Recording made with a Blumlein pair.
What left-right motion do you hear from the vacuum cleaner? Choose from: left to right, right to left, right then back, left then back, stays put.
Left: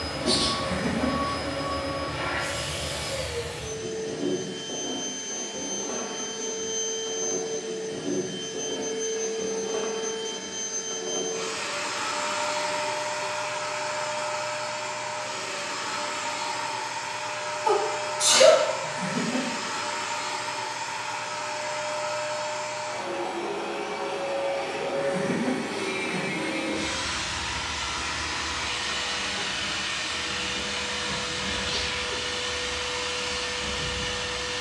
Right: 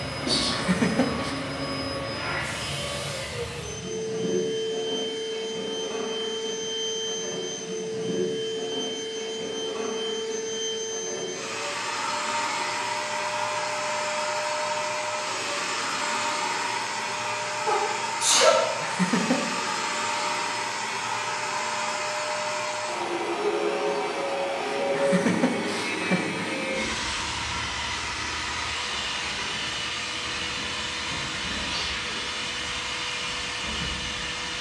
right then back.